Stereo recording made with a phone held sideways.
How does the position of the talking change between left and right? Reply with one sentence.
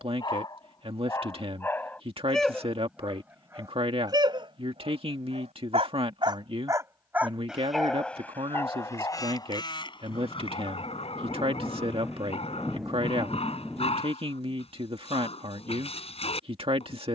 You can hear the talking stay in one place.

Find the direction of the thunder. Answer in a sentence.
You can hear the thunder in the centre.